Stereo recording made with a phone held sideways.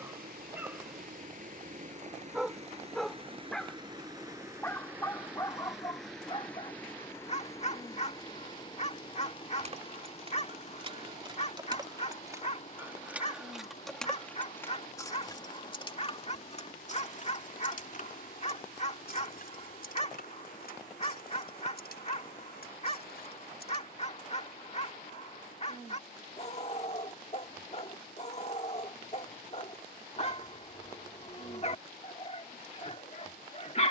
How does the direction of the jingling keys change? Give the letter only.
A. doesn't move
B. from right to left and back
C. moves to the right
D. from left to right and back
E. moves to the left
E.